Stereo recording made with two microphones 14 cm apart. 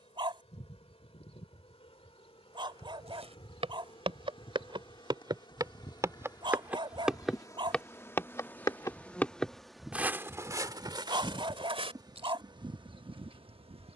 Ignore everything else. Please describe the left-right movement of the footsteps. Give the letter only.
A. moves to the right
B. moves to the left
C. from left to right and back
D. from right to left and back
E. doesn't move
D.